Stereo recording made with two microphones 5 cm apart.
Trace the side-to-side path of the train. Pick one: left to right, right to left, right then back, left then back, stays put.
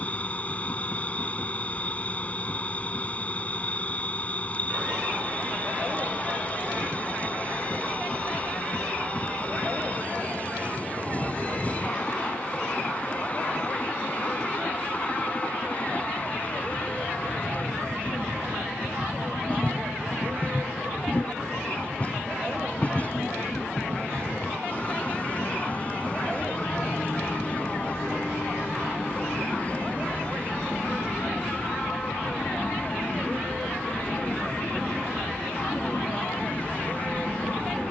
stays put.